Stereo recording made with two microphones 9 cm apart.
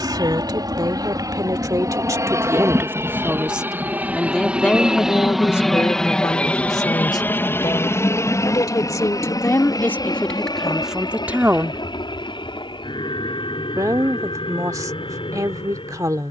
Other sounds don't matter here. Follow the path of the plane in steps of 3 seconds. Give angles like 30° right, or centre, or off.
40° right, 10° right, 20° left, 50° left, 60° left, 60° left.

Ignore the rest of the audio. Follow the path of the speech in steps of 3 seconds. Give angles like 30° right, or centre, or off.
40° right, 10° left, 50° left, 10° left, 40° right, 40° right.